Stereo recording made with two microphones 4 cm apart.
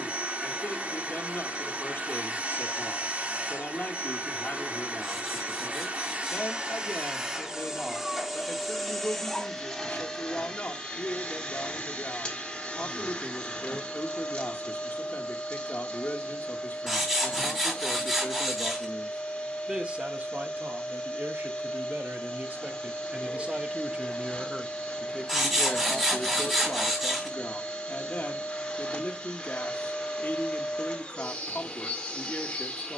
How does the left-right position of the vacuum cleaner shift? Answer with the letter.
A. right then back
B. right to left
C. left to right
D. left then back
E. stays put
B.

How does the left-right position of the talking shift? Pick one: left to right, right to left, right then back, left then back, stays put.
right then back.